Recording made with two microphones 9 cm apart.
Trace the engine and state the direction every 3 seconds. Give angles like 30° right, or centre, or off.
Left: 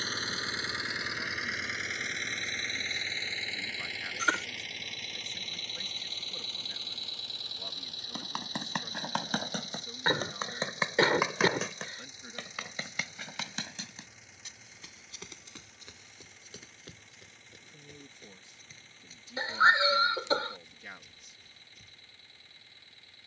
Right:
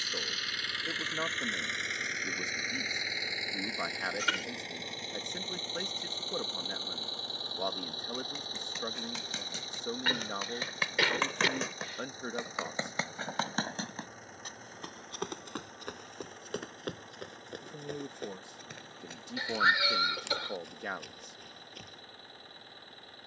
10° left, 20° right, 40° right, 40° right, 40° right, 50° right, 50° right, 50° right.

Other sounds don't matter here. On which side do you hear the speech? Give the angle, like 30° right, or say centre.
60° right.